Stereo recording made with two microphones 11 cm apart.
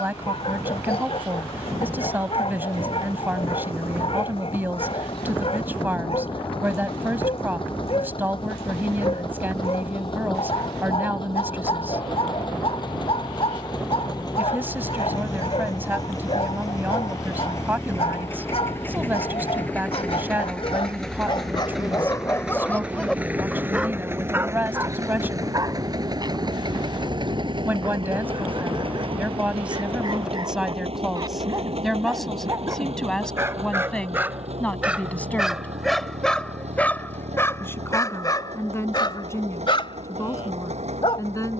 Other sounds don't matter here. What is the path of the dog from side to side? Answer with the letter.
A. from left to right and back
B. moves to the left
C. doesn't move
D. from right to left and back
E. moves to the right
A.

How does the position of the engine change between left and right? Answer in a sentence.
You can hear the engine move to the right.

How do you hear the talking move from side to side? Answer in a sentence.
You can hear the talking move to the left.